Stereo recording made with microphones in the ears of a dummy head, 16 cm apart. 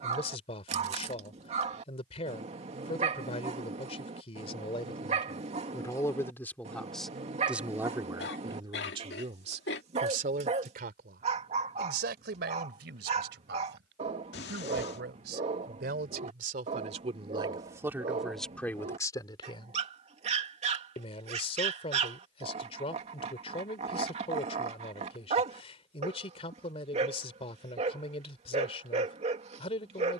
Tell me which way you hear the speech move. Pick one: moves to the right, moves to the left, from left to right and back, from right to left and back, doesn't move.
from left to right and back.